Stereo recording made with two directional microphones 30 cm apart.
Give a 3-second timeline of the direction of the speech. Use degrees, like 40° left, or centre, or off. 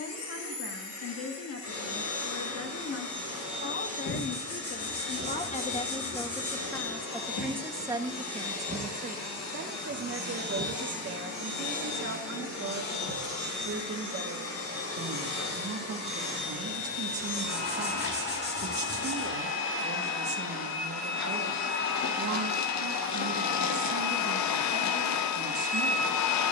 50° left, 30° left, 10° right, 40° right, 50° right, 50° right, 50° right, 50° right, 50° right.